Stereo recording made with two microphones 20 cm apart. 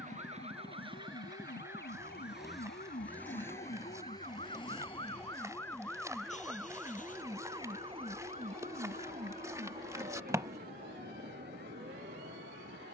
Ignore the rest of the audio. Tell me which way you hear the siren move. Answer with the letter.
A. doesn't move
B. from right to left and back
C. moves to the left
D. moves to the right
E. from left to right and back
D.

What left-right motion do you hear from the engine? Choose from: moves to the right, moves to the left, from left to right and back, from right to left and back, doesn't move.
moves to the left.